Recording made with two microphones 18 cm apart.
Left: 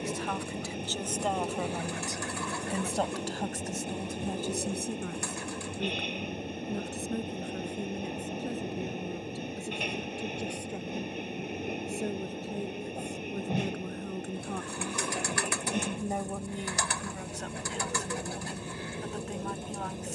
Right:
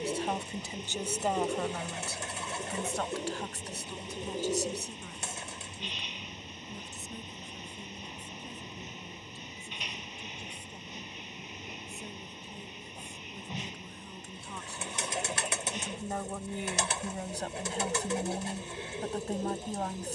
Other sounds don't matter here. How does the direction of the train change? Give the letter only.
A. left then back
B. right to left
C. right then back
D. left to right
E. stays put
E.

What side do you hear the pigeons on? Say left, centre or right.
right.